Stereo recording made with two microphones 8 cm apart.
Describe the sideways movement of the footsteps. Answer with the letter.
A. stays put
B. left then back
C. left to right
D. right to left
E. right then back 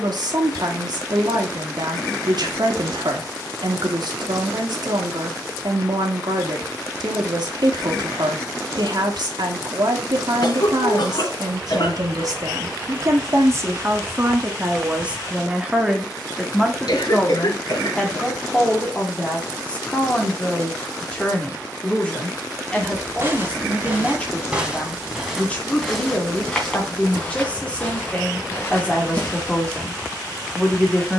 D.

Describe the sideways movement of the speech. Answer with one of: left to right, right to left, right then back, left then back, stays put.
right to left.